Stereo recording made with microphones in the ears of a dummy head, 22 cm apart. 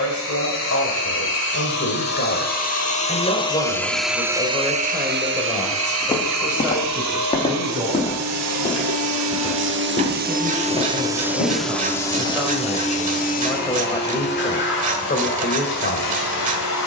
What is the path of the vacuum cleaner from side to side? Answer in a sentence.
In this clip you hear the vacuum cleaner move from left to right and back again.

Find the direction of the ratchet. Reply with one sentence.
You can hear the ratchet on the right.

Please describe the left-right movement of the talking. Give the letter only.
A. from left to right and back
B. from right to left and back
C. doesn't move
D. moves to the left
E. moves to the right
A.